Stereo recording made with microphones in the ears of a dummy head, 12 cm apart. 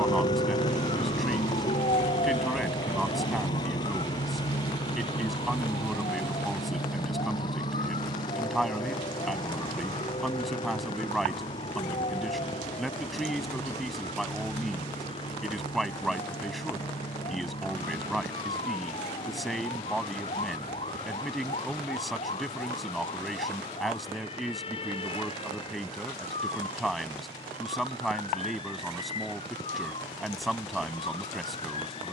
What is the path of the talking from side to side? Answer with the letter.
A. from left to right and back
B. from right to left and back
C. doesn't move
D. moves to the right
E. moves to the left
C.